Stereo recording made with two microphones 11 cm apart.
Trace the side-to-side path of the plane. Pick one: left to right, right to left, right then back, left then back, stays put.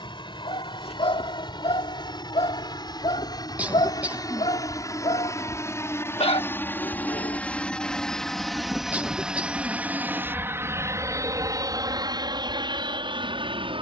left to right.